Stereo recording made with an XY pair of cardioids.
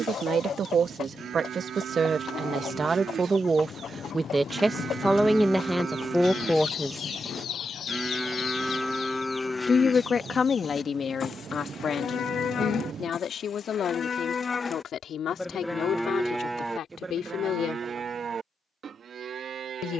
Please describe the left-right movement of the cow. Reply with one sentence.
You can hear the cow move from right to left and back again.